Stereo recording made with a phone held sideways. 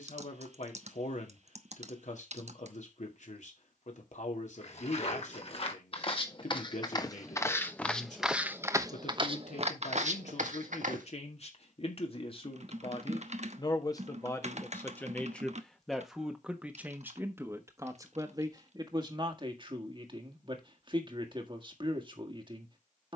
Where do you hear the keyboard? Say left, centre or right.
right.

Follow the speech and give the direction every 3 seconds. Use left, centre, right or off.
left, left, left, left, left, centre, right, right.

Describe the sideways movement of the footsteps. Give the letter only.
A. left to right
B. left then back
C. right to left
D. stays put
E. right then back
A.